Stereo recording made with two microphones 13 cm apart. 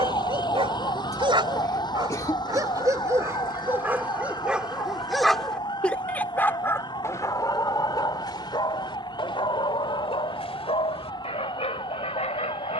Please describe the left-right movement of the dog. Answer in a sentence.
You can hear the dog travel towards the left.